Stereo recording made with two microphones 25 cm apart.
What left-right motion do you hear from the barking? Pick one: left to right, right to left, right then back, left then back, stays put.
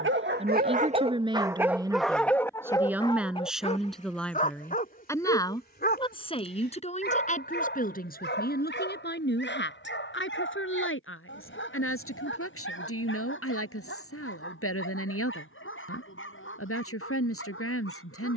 right to left.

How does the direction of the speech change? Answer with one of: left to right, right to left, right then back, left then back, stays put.
right to left.